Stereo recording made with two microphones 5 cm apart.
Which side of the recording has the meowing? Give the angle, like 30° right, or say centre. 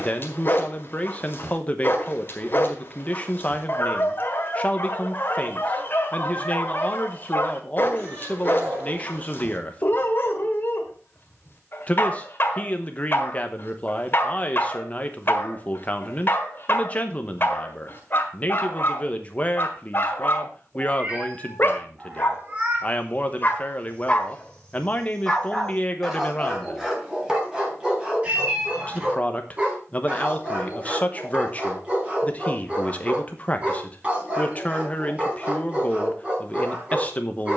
30° right.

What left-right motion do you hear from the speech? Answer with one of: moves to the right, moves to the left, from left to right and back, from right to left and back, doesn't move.
doesn't move.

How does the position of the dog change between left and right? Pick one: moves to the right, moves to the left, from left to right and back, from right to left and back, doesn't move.
moves to the right.